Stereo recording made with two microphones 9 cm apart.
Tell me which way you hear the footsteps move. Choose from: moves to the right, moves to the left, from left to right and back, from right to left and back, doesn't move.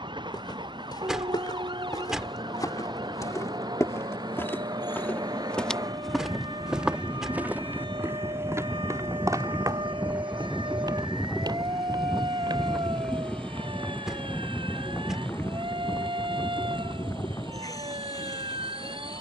moves to the right.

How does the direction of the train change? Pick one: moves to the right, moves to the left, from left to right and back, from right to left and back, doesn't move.
moves to the left.